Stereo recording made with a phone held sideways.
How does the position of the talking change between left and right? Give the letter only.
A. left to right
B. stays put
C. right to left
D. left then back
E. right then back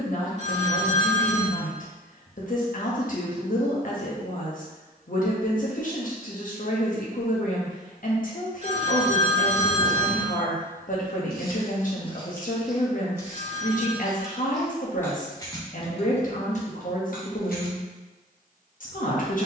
B.